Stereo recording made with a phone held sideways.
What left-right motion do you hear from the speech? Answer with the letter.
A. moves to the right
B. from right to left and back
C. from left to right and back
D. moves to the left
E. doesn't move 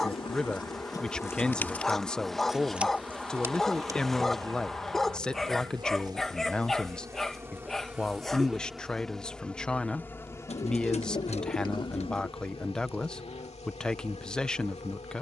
E.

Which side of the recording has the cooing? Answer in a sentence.
In this clip you hear the cooing on the left.